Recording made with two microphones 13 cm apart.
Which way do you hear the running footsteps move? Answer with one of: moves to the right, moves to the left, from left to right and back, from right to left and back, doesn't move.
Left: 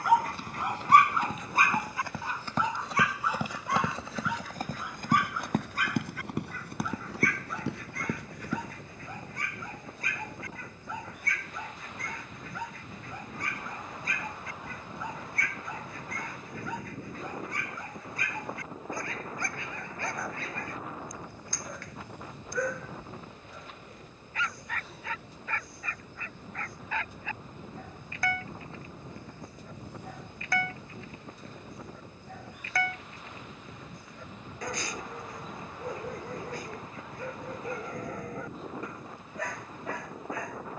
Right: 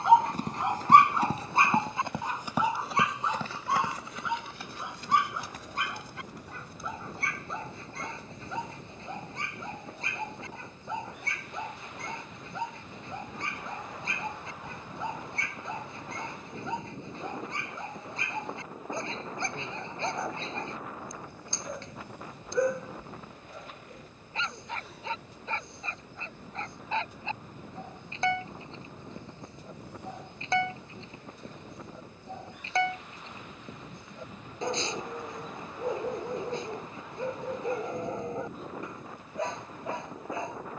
moves to the left.